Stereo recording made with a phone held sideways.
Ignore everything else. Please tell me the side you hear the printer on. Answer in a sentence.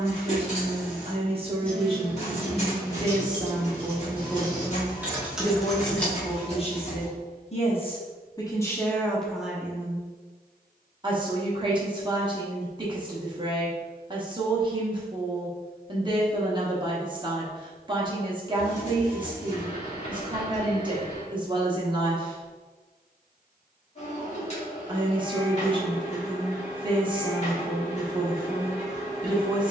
In this clip you hear the printer on the left.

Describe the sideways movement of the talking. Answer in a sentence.
You can hear the talking move from right to left and back again.